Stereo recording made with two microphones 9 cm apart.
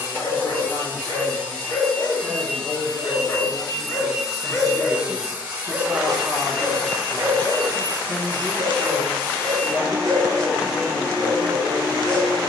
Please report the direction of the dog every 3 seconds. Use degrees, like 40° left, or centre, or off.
50° left, 20° left, 40° right, 70° right.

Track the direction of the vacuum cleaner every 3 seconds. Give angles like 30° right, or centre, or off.
20° left, 10° right, 20° left, 20° left.